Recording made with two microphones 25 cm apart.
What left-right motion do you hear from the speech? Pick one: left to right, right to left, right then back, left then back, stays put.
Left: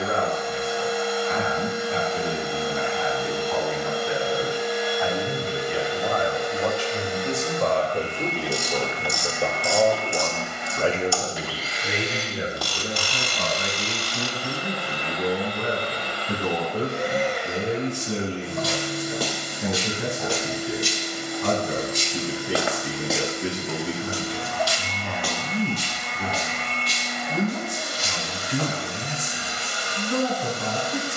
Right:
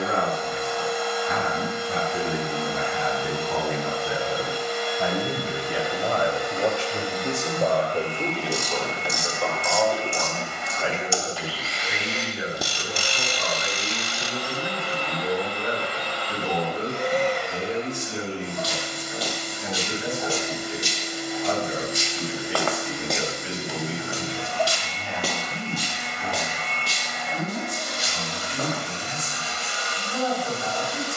right to left.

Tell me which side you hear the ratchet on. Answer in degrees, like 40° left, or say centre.
20° right.